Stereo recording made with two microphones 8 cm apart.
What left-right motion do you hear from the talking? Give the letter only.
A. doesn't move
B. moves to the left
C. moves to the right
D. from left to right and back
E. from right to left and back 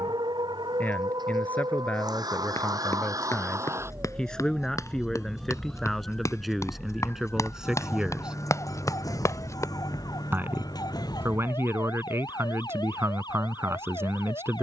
C.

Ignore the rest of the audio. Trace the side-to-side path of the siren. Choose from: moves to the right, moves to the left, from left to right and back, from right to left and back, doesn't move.
moves to the left.